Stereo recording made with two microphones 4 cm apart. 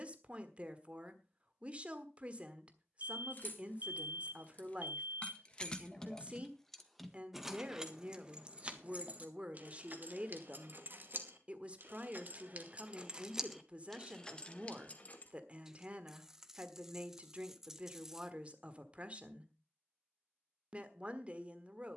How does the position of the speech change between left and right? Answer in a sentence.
In this clip you hear the speech stay put.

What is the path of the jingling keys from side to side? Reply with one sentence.
You can hear the jingling keys go right and come back.